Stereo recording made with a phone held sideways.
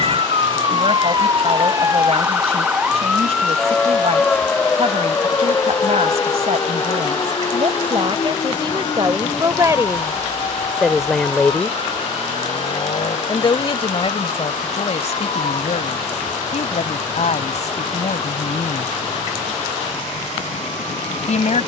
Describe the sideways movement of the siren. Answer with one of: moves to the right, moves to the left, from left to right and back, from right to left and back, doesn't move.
moves to the left.